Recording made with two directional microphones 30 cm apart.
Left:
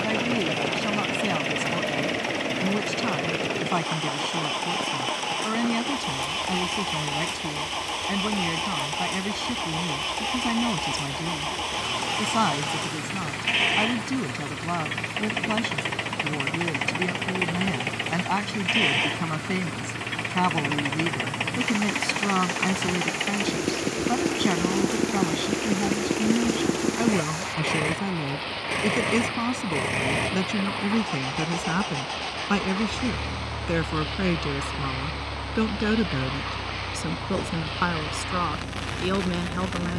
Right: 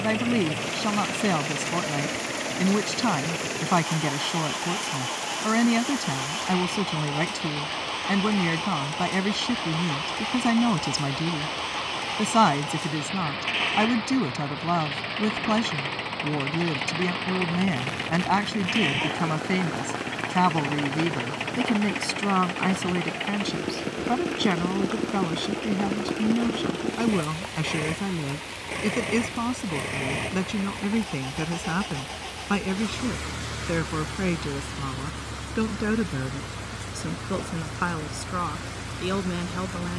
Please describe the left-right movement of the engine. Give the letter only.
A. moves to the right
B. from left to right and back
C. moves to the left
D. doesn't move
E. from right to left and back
D.